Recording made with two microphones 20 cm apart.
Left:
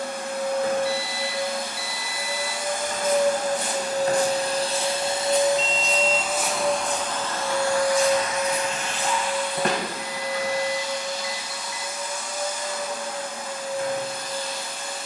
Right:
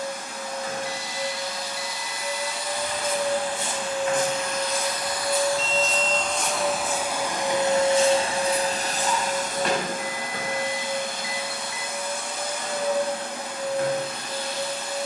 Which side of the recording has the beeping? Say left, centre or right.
left.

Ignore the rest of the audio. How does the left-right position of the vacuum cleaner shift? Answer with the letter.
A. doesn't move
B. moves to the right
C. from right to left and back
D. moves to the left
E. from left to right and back
B.